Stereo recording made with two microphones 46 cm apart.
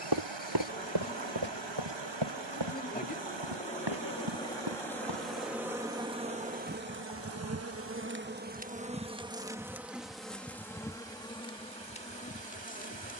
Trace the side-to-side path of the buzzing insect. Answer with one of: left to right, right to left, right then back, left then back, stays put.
right then back.